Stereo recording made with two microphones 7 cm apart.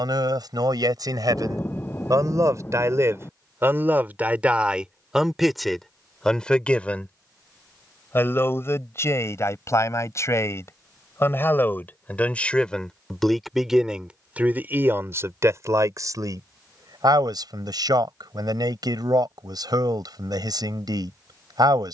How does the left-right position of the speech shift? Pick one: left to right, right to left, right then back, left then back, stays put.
left then back.